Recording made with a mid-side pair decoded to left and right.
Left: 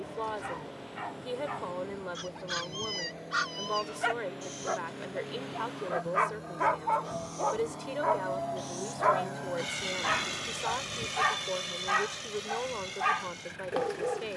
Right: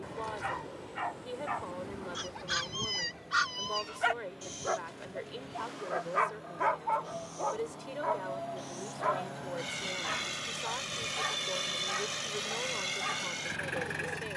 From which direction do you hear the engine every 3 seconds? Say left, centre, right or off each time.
left, left, left, centre, right.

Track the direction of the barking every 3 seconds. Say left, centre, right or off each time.
right, centre, left, left, left.